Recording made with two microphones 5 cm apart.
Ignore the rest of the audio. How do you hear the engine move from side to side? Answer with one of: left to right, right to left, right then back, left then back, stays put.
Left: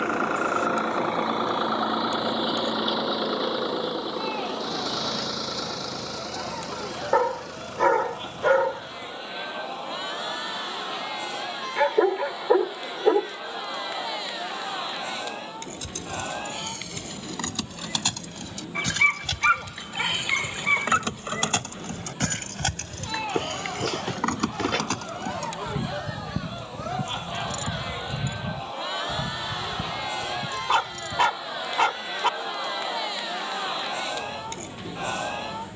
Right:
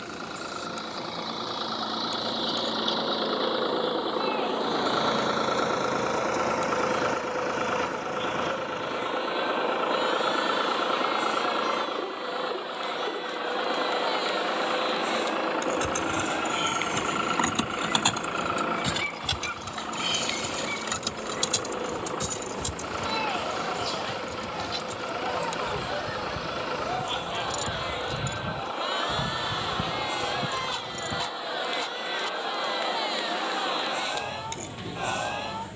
left to right.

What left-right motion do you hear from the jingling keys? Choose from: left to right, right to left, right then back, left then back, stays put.
left then back.